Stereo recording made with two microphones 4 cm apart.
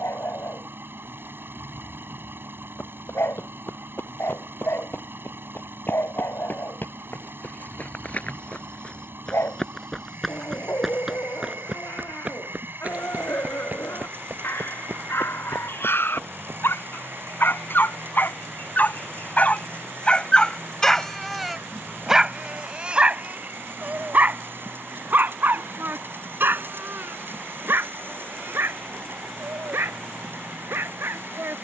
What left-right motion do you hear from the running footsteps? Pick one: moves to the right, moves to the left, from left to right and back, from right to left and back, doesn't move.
moves to the right.